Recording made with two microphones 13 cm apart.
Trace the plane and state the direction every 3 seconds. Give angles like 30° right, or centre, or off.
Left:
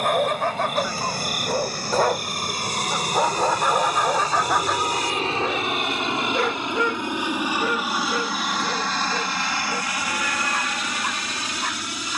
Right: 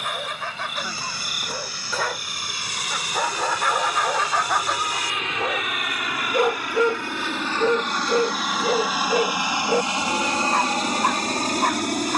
50° left, 40° left, 10° left, 30° right.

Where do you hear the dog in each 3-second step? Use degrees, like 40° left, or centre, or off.
40° left, 10° left, 30° right, 50° right.